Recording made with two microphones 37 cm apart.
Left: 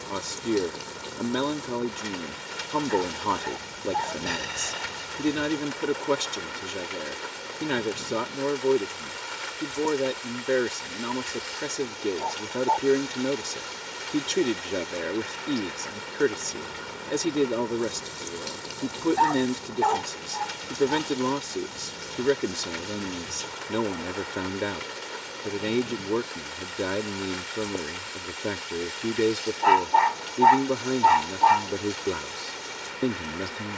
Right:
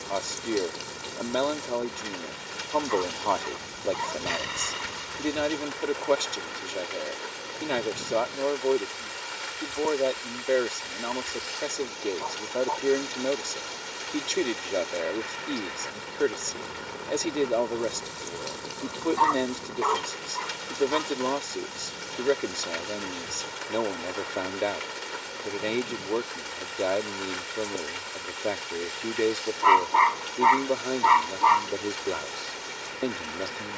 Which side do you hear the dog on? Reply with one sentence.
You can hear the dog in the centre.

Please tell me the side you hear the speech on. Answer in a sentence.
You can hear the speech on the left.